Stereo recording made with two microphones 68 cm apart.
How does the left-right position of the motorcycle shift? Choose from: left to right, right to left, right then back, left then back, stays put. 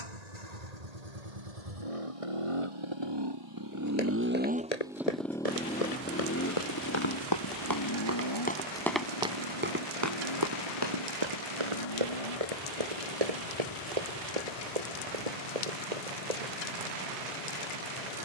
right to left.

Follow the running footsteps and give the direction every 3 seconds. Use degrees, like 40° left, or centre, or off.
off, 60° left, 30° left, 30° right, 60° right, 60° right.